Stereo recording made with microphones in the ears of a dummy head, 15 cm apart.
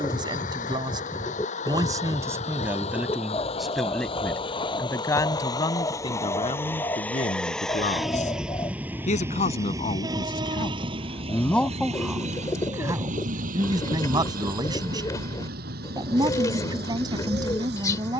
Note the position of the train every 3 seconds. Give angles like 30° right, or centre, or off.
50° left, 30° left, centre, 30° right, 50° right, 60° right.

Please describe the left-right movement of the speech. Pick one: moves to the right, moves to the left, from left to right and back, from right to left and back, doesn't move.
from right to left and back.